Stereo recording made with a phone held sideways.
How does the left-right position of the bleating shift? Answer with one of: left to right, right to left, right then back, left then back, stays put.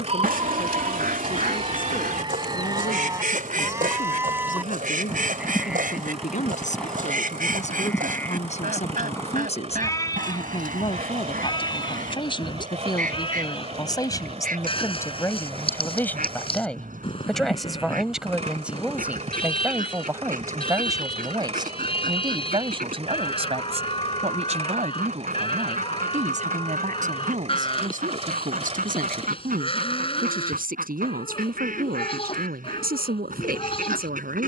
right to left.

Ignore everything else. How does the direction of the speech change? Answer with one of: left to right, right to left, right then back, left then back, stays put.
left to right.